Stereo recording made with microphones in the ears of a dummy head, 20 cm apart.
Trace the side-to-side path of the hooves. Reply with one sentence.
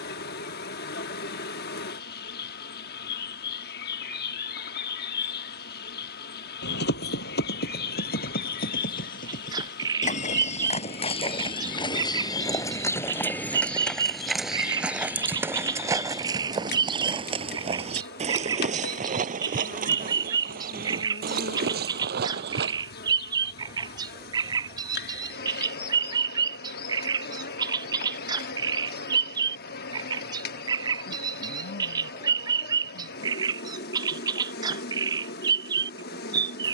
In this clip you hear the hooves move from left to right.